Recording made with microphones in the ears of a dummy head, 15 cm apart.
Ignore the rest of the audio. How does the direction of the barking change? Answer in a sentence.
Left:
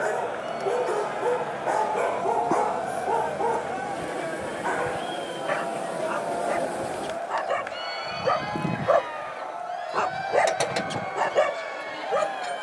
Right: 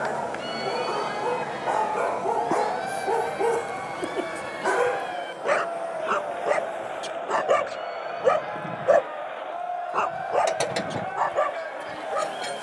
You can hear the barking move from left to right and back again.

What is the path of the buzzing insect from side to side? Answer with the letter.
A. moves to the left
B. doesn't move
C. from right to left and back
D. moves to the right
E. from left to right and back
C.